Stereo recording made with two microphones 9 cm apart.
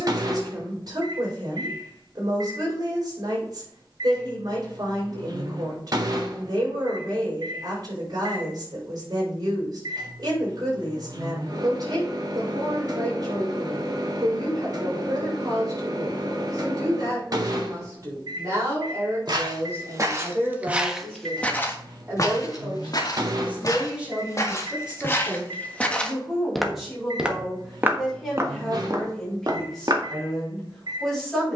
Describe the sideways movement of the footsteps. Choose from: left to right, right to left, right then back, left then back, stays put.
left then back.